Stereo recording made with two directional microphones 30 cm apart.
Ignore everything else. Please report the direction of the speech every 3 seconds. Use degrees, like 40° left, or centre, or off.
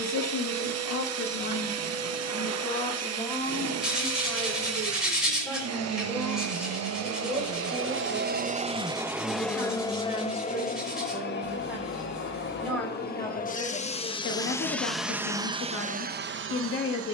50° left, 10° left, 10° right, 10° right, 20° left, 40° left.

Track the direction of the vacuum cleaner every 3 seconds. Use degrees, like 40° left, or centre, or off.
60° right, 60° right, 40° right, 20° left, 20° left, 30° right.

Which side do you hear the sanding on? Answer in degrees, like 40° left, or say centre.
centre.